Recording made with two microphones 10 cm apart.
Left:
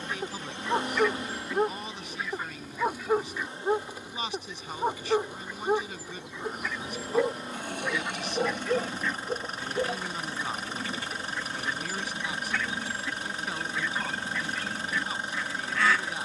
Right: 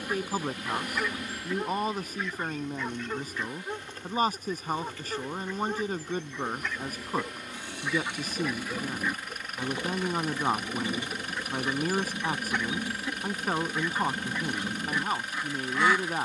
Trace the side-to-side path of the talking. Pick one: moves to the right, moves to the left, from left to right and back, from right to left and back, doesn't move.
doesn't move.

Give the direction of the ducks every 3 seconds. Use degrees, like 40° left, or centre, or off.
centre, 10° left, centre, 20° right, 20° right, 20° right.